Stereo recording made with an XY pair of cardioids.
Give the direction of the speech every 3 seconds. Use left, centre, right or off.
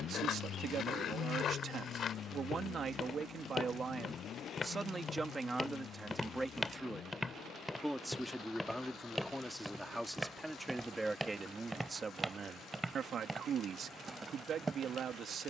right, right, centre, centre, right.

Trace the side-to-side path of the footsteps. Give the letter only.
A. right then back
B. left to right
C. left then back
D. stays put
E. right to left
B.